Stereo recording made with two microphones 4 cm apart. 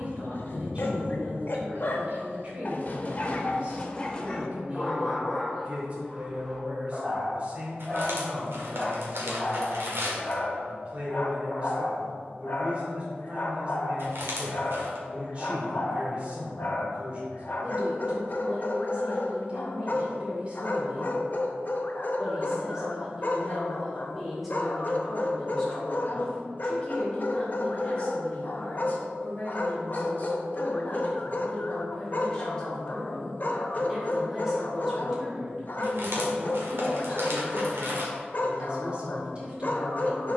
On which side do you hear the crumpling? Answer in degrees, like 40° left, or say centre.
70° right.